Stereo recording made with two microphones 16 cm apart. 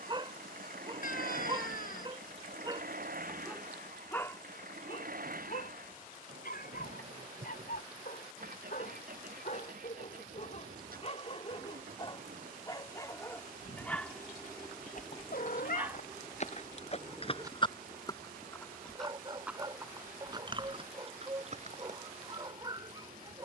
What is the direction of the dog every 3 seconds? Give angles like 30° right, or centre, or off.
30° right, 30° left, 70° left, 50° left, 10° left, 10° right, 30° right, 30° right.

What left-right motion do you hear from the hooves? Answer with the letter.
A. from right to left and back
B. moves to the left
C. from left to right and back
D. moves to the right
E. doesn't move
D.